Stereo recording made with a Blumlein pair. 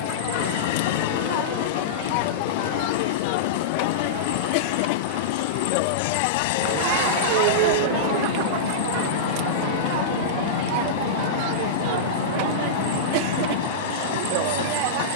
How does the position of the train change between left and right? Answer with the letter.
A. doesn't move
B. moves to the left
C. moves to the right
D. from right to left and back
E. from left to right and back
A.